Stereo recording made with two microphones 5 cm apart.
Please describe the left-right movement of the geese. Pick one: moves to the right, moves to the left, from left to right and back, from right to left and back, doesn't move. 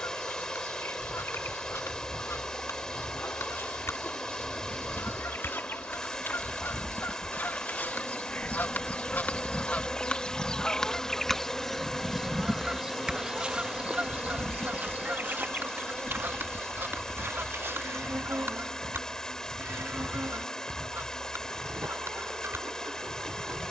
moves to the right.